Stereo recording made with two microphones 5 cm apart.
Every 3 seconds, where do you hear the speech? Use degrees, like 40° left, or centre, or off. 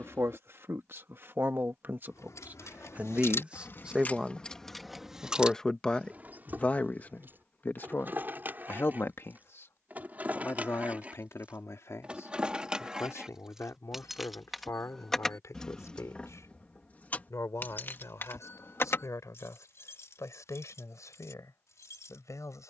50° right, 10° right, 40° left, 60° left, 70° left, 70° left, 80° left, 80° left.